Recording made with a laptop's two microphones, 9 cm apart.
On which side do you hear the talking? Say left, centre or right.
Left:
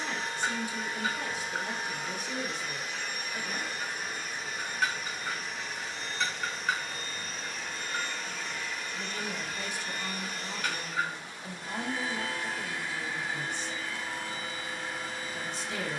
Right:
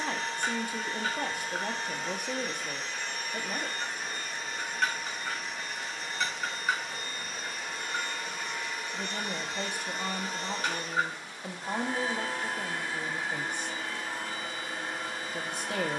right.